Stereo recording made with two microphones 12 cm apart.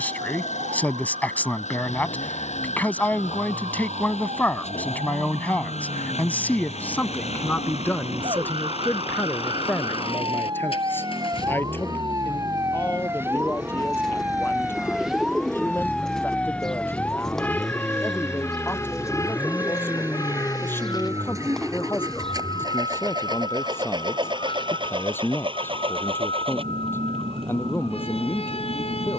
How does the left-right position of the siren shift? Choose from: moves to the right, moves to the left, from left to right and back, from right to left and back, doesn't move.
moves to the left.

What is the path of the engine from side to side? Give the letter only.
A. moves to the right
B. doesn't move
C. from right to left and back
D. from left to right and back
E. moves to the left
A.